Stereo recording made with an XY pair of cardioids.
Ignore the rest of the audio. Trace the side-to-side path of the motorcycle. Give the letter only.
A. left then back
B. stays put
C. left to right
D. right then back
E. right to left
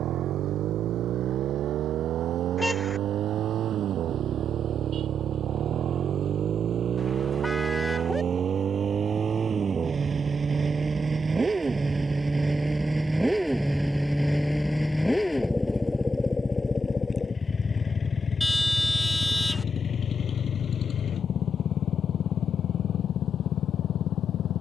E.